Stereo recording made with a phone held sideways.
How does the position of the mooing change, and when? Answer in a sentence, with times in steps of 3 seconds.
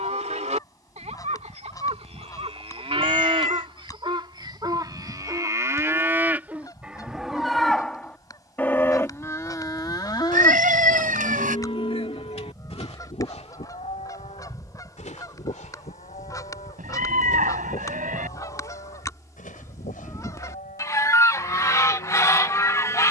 In this clip you hear the mooing on the right from 0 s, in the centre from 6 s and on the left from 9 s.